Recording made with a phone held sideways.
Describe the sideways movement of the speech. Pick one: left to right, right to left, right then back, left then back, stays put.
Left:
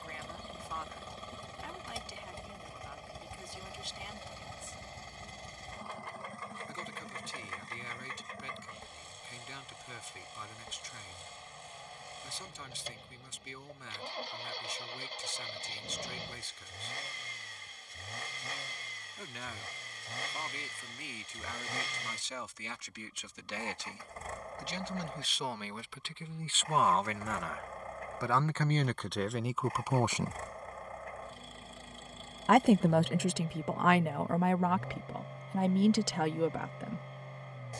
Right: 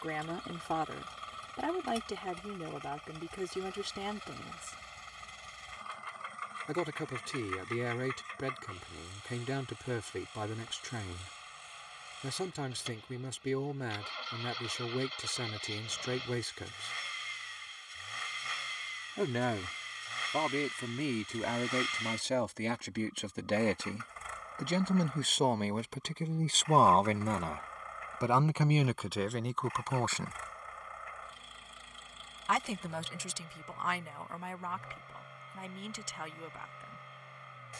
right to left.